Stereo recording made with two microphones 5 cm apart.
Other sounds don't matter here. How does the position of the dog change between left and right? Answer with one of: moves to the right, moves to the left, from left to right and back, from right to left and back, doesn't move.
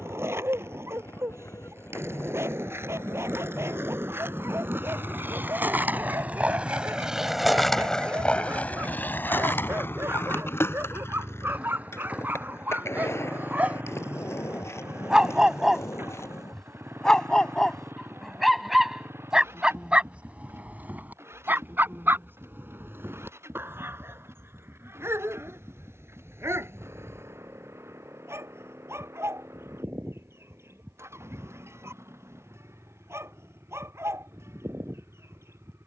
from right to left and back.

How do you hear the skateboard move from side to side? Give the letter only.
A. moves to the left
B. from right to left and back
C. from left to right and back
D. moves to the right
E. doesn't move
A.